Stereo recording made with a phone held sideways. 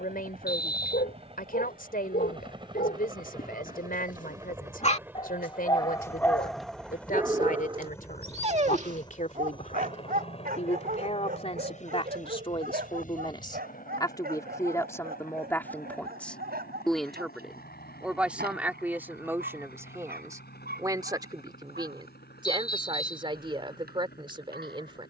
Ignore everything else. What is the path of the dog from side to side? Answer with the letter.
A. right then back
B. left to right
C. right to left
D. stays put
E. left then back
B.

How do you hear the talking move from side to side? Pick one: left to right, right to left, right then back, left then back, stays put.
left to right.